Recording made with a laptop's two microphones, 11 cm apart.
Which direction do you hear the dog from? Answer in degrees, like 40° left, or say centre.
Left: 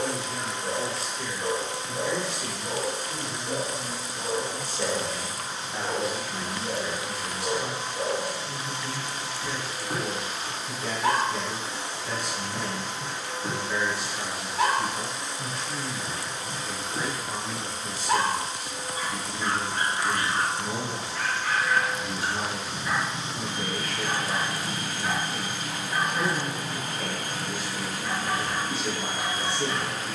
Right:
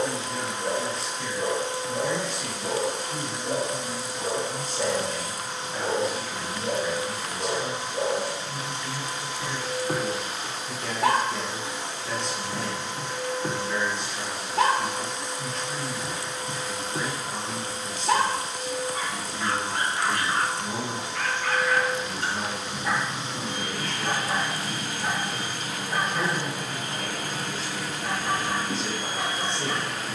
70° right.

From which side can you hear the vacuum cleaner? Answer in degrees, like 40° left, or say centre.
80° right.